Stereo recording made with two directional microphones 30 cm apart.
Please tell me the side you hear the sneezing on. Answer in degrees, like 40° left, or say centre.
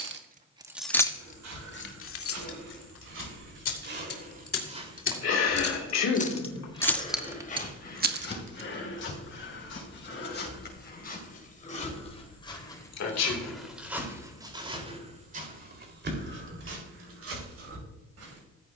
60° left.